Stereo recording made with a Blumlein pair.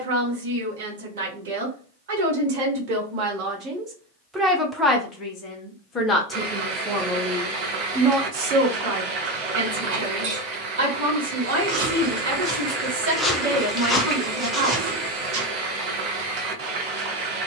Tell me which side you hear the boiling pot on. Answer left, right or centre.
right.